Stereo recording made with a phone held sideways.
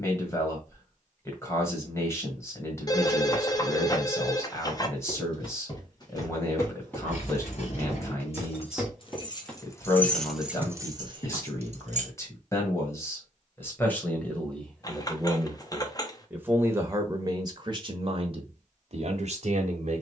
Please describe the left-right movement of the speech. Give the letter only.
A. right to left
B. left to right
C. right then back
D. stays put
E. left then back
B.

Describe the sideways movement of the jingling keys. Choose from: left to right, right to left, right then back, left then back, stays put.
left to right.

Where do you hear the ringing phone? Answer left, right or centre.
left.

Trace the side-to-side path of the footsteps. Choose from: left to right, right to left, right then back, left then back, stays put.
right then back.